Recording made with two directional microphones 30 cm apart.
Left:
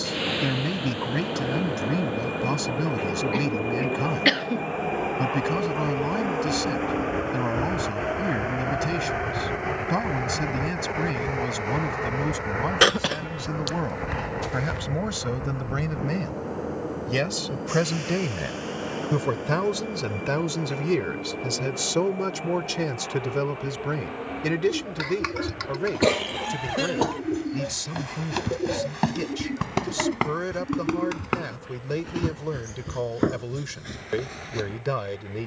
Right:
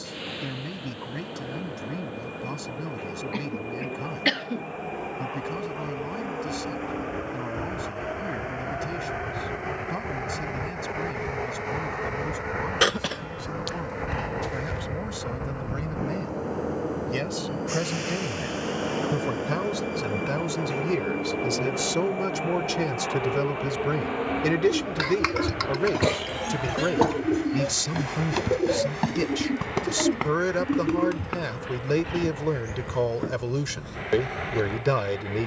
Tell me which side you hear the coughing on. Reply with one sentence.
You can hear the coughing in the centre.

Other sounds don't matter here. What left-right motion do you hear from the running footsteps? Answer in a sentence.
You can hear the running footsteps travel towards the left.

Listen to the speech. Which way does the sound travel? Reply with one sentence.
In this clip you hear the speech move to the right.